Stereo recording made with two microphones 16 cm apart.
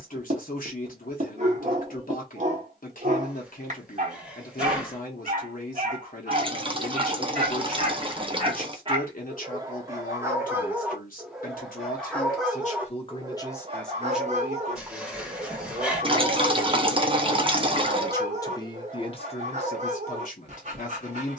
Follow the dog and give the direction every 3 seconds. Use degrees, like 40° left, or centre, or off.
50° right, 50° right, 40° right, 10° right, 30° right, 50° right, 50° right.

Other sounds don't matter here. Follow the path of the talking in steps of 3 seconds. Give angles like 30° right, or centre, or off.
60° left, 60° left, 60° left, 60° left, 20° left, 20° right, 40° left.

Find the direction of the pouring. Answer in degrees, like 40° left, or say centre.
30° right.